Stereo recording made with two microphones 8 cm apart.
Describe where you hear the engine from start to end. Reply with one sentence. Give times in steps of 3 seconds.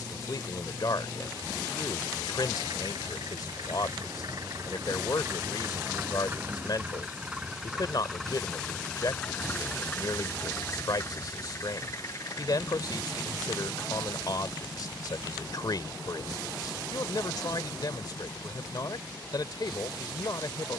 You can hear the engine on the right from 0 s, in the centre from 6 s and on the left from 9 s.